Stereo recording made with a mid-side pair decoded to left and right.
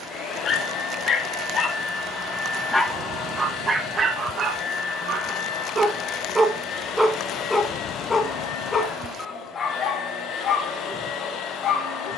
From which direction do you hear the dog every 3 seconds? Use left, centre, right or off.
left, right, centre, left.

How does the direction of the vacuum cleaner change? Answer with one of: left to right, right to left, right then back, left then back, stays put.
stays put.